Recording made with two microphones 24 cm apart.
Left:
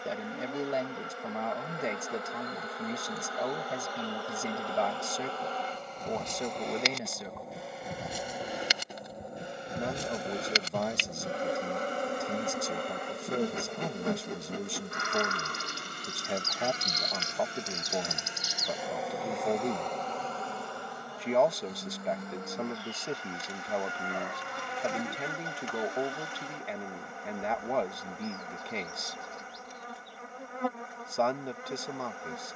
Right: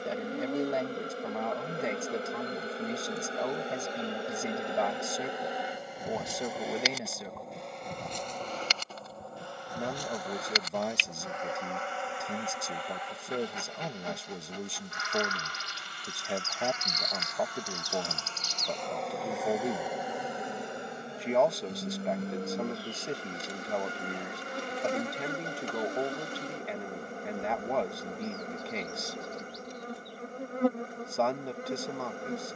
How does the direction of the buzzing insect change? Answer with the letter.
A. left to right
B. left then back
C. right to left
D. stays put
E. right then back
B.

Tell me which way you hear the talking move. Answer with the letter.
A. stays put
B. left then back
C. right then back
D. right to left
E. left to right
A.